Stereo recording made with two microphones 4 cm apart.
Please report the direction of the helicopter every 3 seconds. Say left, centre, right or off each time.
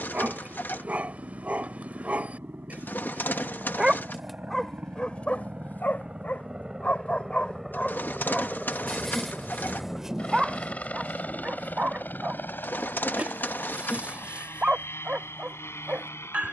right, right, centre, left, left, left.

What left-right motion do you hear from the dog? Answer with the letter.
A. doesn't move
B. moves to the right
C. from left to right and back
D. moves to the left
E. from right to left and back
E.